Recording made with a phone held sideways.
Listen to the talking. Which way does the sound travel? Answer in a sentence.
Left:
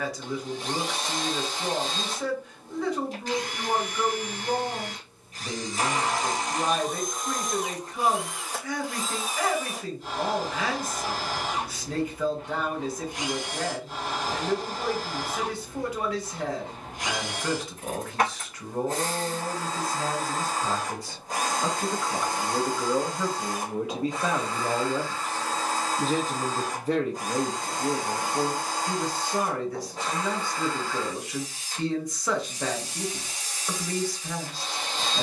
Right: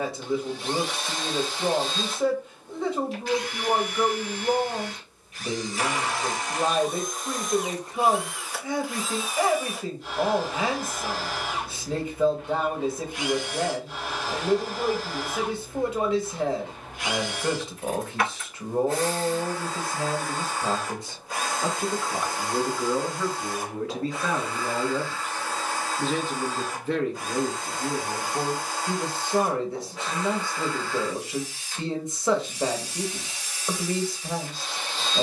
You can hear the talking move from right to left and back again.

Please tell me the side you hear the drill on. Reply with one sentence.
In this clip you hear the drill on the left.